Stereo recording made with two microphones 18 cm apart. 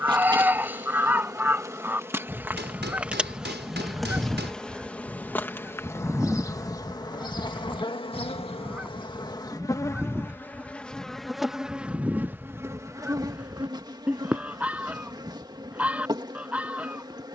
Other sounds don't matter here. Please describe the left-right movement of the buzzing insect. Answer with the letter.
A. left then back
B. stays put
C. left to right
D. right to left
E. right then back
A.